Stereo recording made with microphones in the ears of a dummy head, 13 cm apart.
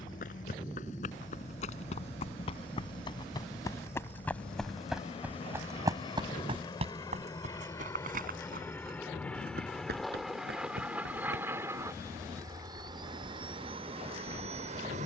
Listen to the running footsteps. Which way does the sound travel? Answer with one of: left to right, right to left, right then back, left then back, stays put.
left to right.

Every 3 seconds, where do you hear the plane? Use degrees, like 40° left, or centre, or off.
50° left, 40° left, 20° left, centre, 30° right.